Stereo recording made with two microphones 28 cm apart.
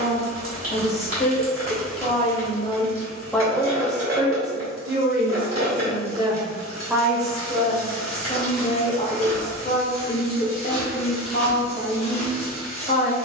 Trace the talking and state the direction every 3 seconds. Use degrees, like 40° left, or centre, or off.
30° left, 20° right, centre, 30° left, 30° left.